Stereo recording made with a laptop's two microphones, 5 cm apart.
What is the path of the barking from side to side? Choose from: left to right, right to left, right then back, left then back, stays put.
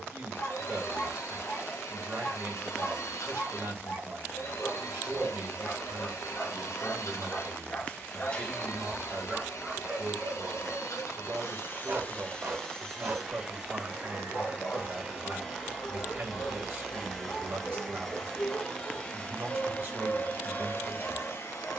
right then back.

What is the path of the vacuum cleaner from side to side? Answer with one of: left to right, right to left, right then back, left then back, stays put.
right then back.